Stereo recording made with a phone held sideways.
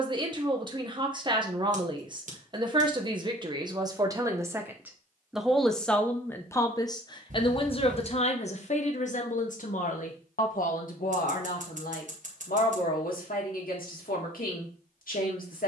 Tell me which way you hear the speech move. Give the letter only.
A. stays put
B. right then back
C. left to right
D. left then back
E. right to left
E.